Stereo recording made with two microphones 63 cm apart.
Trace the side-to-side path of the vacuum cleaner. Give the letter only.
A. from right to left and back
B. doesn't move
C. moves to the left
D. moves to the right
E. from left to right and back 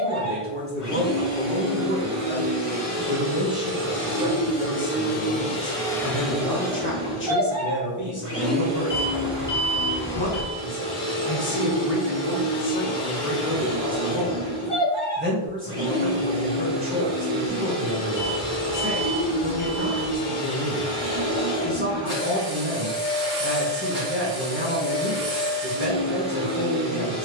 D.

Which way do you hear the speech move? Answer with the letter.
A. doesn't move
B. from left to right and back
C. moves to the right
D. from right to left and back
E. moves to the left
D.